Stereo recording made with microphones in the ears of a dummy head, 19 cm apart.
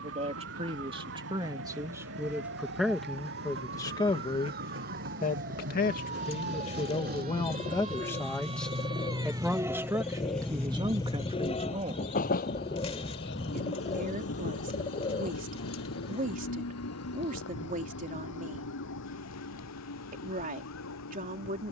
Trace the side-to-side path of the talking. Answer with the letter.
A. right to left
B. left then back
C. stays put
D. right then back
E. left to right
B.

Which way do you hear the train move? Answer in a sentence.
You can hear the train go from the right side to the left.